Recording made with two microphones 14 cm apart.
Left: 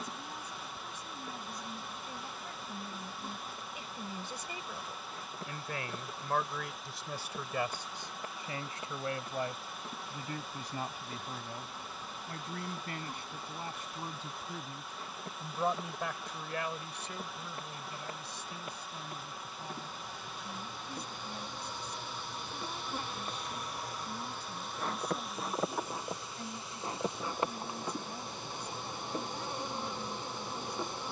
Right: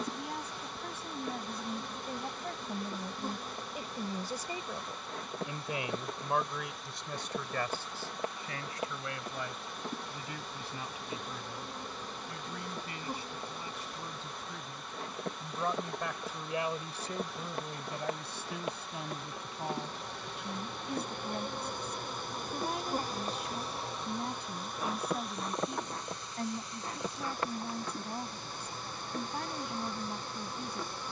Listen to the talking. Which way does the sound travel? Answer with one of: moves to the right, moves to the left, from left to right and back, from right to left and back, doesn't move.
from right to left and back.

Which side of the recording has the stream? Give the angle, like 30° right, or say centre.
centre.